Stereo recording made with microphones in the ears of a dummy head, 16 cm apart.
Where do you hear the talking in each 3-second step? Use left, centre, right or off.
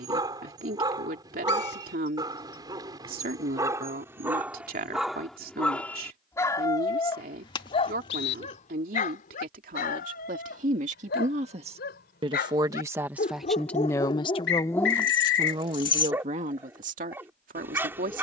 right, right, right, right, centre, right.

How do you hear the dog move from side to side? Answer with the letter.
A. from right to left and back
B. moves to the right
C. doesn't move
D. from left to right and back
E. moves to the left
A.